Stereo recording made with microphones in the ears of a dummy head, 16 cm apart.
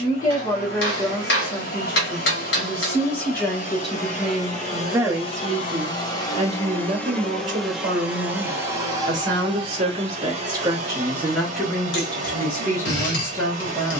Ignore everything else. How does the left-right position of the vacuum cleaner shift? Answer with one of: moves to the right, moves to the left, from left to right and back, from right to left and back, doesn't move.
moves to the right.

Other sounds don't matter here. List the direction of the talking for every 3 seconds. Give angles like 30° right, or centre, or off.
20° left, 10° right, 40° right, 20° right, 10° left.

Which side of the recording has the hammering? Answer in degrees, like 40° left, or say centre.
70° left.